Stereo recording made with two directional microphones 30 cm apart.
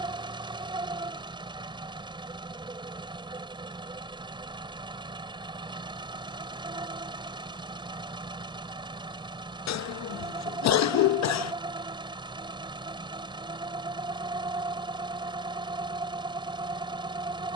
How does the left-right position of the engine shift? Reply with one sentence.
You can hear the engine stay in one place.